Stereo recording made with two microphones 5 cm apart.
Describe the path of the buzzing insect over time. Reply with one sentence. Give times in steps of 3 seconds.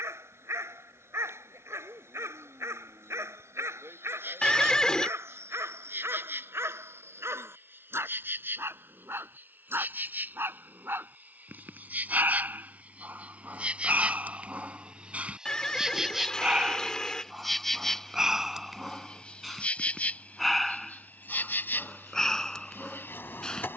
You can hear the buzzing insect on the right from 0 s, in the centre from 15 s and on the left from 18 s.